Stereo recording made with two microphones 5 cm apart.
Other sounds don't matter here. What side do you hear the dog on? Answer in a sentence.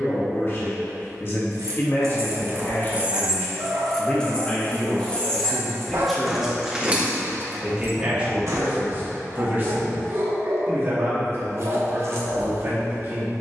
You can hear the dog on the right.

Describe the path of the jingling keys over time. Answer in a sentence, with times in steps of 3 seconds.
You can hear the jingling keys on the right from 0 s, in the centre from 3 s, on the right from 6 s and not at all from 9 s.